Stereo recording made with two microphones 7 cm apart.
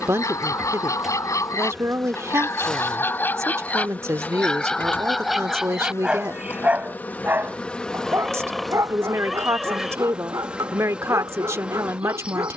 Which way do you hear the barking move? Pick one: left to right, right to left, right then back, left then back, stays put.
left to right.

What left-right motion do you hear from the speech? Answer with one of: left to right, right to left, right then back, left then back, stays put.
stays put.